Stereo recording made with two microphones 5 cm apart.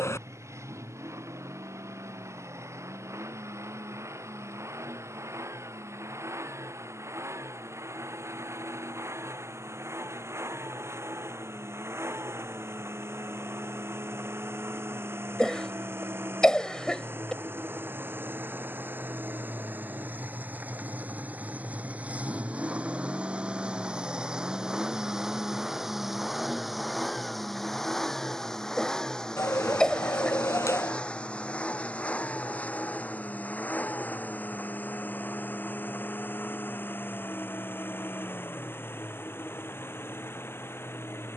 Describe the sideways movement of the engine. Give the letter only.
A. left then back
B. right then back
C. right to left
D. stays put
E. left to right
C.